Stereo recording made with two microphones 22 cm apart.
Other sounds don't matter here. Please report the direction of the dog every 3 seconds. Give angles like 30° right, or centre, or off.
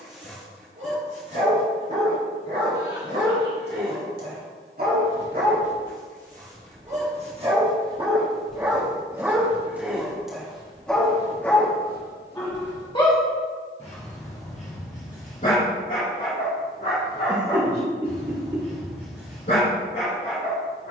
60° right, 50° right, 30° right, centre, 30° left, 40° left, 50° left.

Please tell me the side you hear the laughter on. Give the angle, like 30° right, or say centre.
20° right.